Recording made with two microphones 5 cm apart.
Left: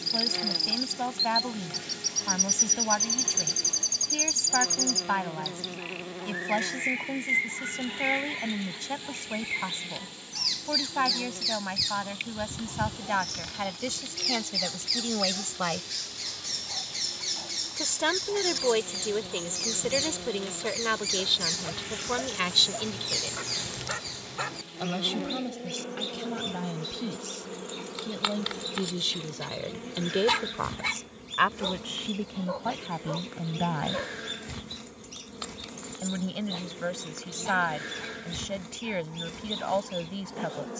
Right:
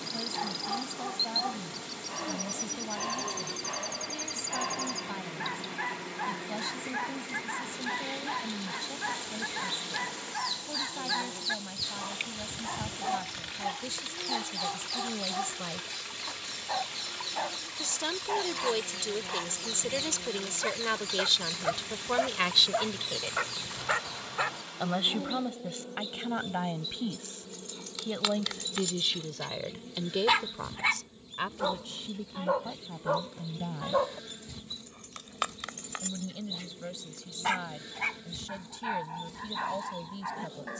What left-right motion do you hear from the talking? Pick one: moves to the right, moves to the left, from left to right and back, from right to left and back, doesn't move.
from left to right and back.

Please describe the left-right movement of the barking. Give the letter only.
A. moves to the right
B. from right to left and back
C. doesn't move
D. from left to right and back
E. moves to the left
B.